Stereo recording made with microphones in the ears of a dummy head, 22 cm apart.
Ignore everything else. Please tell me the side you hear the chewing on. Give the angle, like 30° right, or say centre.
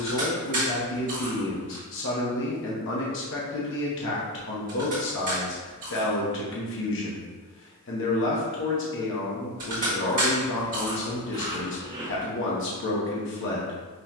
30° right.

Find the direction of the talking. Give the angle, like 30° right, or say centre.
50° left.